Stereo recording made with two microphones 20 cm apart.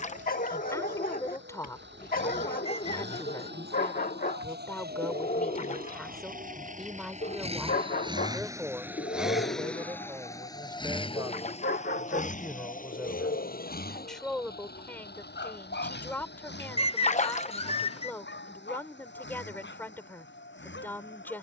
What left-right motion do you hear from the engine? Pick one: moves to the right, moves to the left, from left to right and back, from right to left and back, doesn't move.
moves to the left.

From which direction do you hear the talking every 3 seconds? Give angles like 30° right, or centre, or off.
20° left, 10° left, centre, 20° right, centre, 10° left, 10° left.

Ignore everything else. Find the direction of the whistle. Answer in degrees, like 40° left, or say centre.
30° left.